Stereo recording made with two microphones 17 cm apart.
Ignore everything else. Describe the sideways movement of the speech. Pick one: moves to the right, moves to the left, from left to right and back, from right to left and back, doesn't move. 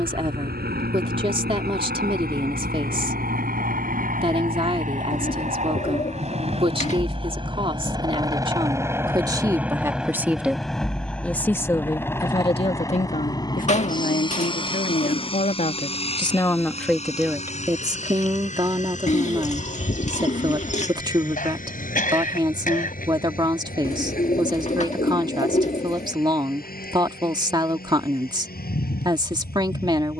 from right to left and back.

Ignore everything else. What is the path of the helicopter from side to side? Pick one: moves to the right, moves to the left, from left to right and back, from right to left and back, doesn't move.
moves to the left.